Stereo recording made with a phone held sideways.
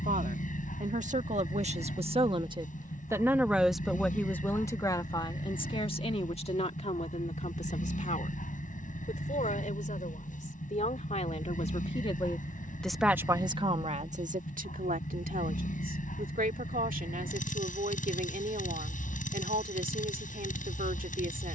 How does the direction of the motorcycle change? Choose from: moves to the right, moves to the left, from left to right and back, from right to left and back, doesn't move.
doesn't move.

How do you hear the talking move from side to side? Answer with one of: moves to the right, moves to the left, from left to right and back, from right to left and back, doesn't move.
from right to left and back.